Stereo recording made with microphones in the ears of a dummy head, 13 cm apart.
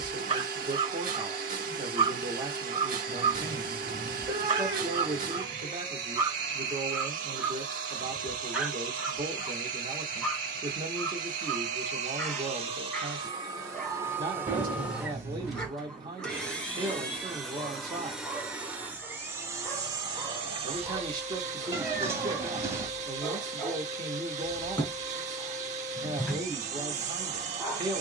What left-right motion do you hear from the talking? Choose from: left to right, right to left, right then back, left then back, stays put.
stays put.